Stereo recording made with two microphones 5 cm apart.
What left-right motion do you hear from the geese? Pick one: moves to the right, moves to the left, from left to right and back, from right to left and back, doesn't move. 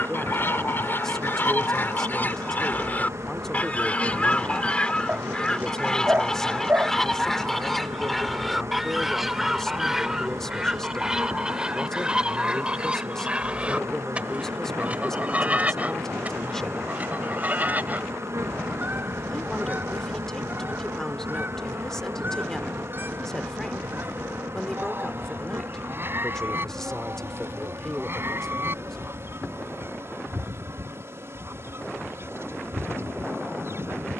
moves to the right.